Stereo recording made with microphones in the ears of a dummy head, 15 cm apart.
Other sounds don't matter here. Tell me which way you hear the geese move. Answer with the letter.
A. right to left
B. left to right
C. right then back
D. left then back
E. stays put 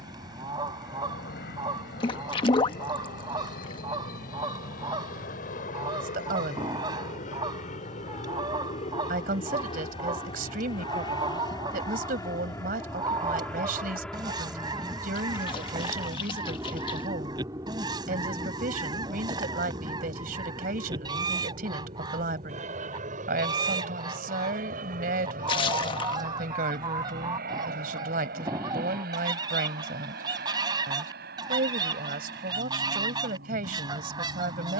E.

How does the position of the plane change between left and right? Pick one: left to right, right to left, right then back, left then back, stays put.
left to right.